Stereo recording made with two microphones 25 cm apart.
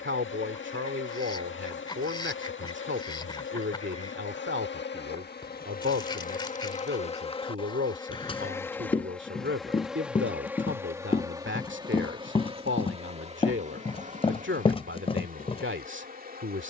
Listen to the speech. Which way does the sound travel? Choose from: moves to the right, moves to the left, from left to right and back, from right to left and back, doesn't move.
doesn't move.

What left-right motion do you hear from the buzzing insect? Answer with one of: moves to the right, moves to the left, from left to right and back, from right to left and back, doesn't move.
moves to the right.